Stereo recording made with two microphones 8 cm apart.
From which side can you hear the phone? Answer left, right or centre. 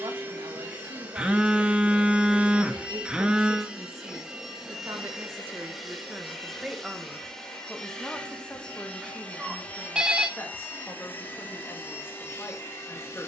centre.